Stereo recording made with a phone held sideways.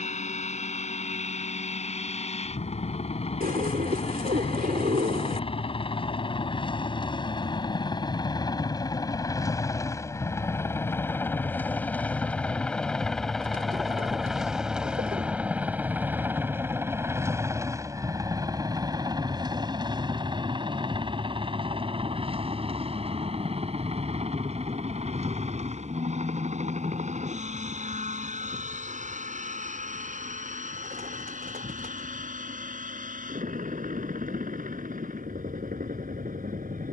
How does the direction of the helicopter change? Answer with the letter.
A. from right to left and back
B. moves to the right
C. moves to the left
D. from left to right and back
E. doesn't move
B.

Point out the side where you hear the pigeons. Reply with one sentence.
You can hear the pigeons on the right.